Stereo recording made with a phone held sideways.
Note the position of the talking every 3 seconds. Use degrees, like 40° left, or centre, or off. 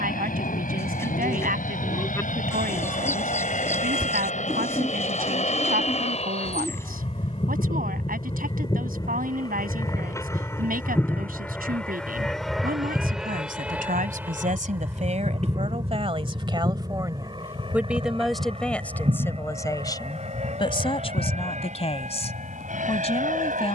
60° right, 60° right, 60° right, 60° right, 60° right, 30° right, 20° left, 40° left.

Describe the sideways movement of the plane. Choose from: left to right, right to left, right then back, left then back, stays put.
left to right.